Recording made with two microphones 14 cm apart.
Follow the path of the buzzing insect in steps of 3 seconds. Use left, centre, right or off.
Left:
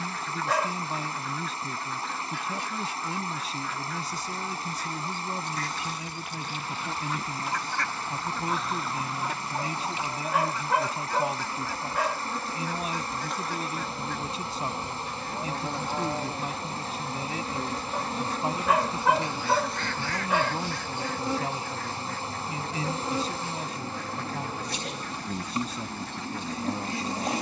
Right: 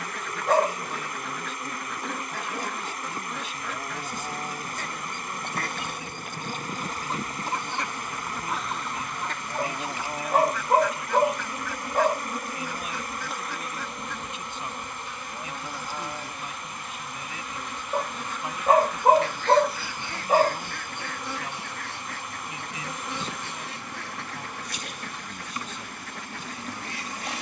right, right, right, right, centre, left, left, left, left.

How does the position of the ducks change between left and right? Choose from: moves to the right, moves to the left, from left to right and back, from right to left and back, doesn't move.
from right to left and back.